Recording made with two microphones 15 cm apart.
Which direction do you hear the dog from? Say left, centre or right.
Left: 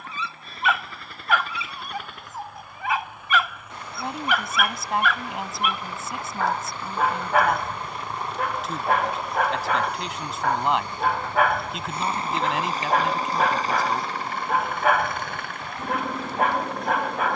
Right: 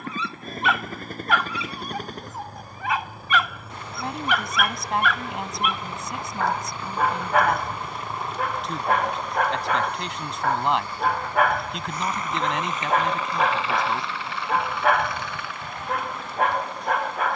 centre.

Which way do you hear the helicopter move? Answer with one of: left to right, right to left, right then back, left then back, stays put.
right to left.